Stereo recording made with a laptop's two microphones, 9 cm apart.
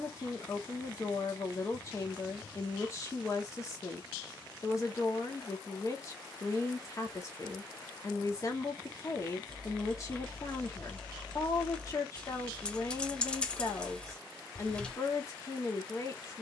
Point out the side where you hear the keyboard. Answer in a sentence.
In this clip you hear the keyboard in the centre.